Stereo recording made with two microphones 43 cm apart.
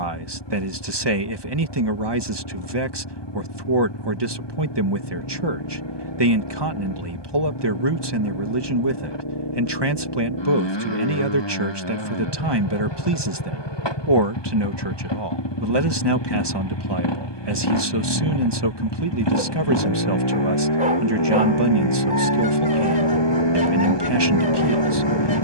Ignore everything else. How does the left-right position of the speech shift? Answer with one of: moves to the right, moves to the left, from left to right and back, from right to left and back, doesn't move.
doesn't move.